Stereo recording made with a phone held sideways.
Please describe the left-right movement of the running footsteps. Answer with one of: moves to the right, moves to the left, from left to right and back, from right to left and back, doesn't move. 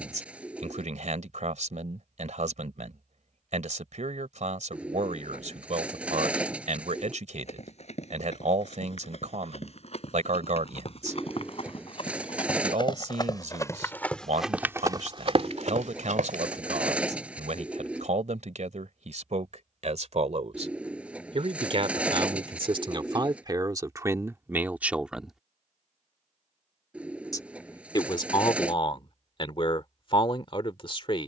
moves to the right.